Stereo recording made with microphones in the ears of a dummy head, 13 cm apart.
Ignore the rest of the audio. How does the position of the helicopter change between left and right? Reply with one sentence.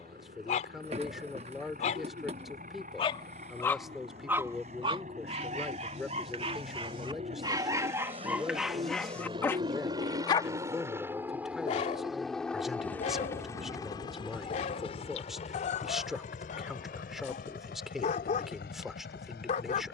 You can hear the helicopter move to the left.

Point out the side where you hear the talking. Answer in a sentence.
You can hear the talking in the centre.